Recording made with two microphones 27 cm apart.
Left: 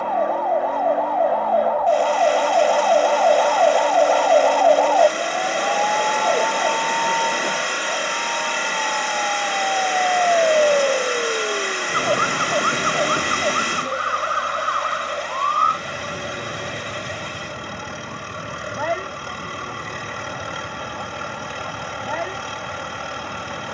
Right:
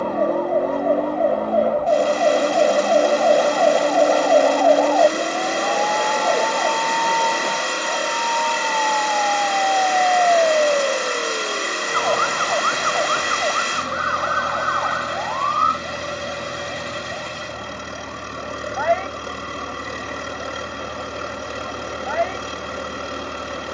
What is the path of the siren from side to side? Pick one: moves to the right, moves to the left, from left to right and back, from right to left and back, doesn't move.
moves to the left.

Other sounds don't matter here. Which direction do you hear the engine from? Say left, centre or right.
right.